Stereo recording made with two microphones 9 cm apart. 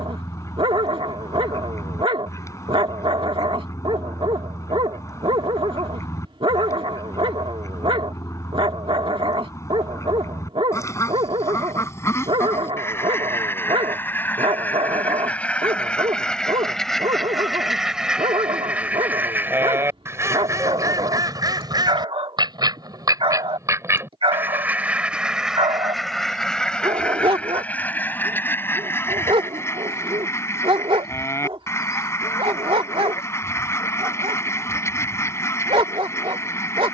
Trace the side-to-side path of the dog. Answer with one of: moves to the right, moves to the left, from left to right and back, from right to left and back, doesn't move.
doesn't move.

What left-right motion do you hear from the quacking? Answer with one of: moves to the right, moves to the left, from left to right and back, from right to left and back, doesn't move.
from left to right and back.